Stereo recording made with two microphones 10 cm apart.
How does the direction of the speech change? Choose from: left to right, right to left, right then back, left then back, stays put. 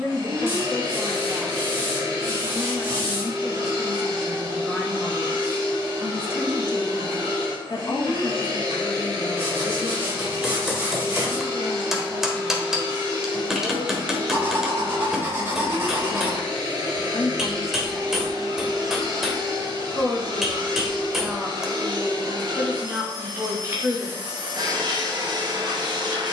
left then back.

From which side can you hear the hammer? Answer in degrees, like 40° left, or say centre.
centre.